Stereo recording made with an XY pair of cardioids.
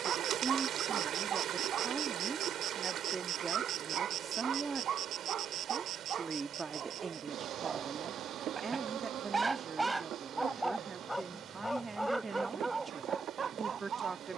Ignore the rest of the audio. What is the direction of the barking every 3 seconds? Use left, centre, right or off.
right, right, right, centre, right.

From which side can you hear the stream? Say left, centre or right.
right.